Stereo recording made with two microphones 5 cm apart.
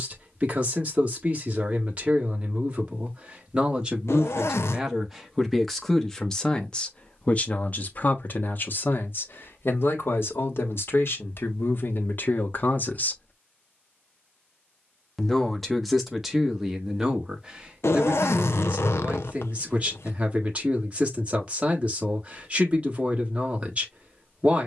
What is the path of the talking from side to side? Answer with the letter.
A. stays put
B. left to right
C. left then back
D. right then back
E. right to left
C.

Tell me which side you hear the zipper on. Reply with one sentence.
You can hear the zipper on the left.